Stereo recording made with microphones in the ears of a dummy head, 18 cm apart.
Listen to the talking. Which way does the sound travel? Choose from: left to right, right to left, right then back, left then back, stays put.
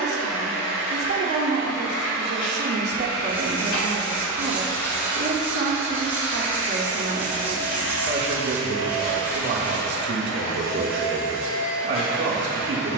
stays put.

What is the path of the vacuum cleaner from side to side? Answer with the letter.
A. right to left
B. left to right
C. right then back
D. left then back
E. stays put
E.